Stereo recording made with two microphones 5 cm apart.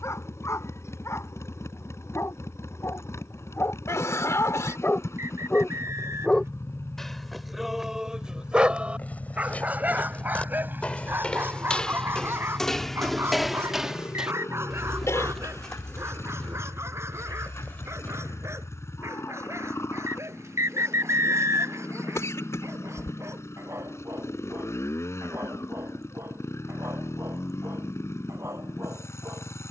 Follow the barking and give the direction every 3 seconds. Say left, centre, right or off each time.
left, left, centre, right, right, right, right, right, right, right.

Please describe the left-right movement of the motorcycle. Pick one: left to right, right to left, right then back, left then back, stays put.
stays put.